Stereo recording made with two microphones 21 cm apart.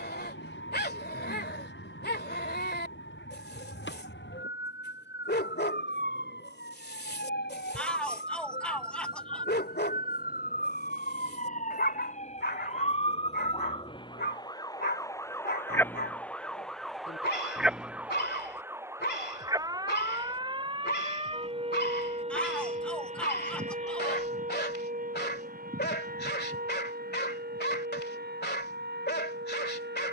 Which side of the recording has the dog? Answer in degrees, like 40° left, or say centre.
50° left.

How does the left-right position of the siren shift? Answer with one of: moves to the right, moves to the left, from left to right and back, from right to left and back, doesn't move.
moves to the right.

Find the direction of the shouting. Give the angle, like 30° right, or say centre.
10° left.